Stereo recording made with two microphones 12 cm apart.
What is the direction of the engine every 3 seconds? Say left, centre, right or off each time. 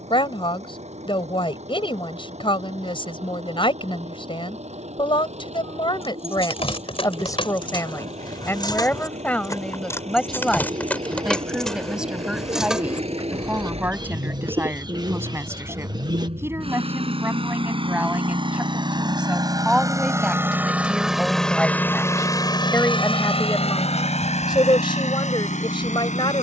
right, right, right, right, right, right, right, left, left.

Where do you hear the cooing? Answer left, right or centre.
right.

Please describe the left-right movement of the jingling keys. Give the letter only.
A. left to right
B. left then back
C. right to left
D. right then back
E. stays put
A.